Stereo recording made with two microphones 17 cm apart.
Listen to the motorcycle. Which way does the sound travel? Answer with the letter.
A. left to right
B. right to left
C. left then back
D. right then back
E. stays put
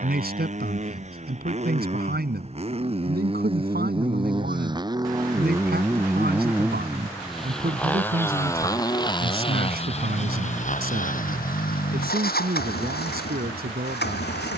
B.